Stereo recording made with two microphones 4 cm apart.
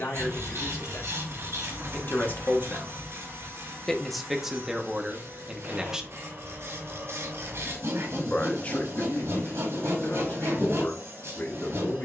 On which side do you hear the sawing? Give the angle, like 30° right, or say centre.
80° right.